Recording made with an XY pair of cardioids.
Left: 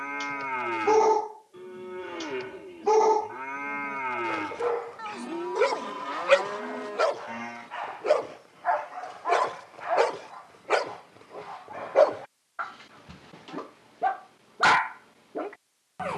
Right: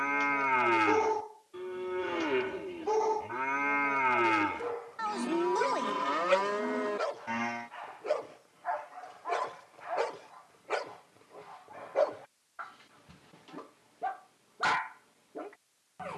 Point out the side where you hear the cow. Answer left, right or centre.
right.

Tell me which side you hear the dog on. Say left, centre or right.
left.